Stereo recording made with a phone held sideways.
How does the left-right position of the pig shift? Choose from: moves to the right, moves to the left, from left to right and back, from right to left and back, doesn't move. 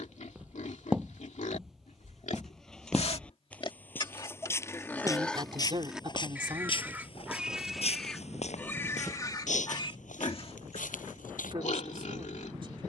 from left to right and back.